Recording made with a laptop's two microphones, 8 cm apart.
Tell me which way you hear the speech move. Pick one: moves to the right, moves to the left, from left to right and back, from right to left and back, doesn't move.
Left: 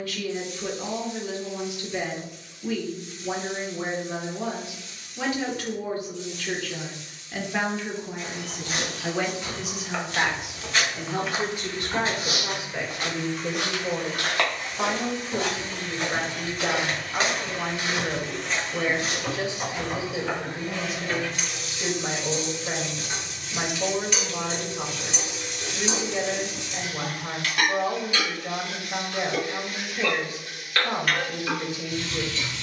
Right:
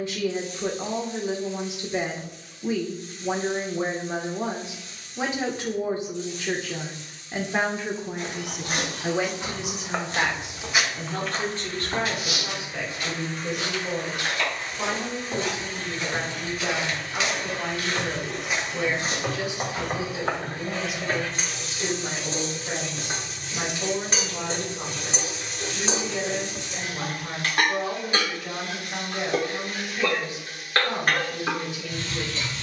moves to the left.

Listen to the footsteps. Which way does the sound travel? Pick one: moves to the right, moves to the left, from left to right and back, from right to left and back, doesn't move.
from right to left and back.